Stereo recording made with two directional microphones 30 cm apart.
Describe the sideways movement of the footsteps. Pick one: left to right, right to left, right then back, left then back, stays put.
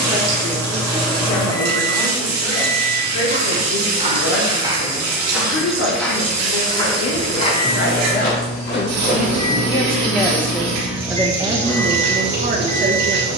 right to left.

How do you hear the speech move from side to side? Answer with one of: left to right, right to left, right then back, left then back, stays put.
left to right.